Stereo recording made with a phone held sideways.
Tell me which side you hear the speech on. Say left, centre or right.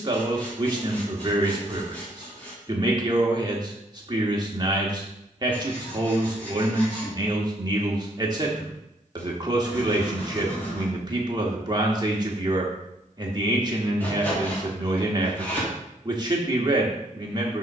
right.